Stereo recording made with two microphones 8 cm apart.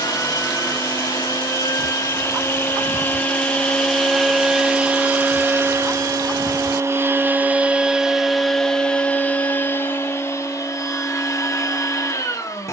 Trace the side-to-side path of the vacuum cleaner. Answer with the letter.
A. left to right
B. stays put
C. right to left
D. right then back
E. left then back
D.